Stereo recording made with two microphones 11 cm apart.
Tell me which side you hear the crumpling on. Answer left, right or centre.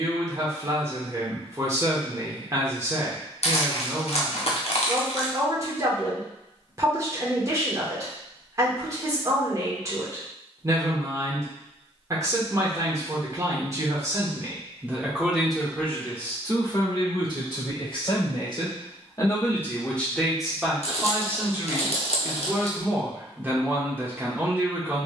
left.